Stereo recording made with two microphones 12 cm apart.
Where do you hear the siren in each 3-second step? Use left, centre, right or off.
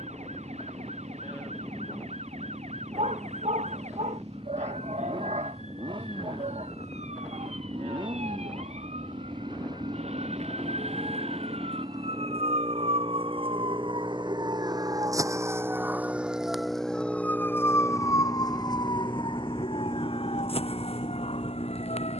right, right, right, right, right, centre, left, left.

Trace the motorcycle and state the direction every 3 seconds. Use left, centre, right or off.
right, right, right, right, right, centre, left, left.